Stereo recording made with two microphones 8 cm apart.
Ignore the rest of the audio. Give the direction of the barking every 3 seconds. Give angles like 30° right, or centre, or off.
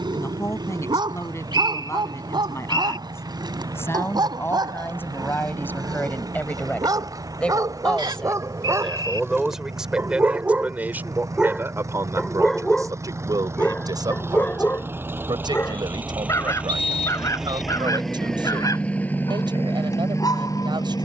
70° right, 60° right, 50° right, 20° right, 20° left, 40° left, 50° left.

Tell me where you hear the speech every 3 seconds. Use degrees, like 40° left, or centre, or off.
40° left, 30° left, 10° left, 20° right, 50° right, 70° right, 70° right.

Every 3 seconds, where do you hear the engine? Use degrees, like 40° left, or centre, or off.
60° right, 50° right, 50° right, 50° right, 40° right, 20° right, 30° left.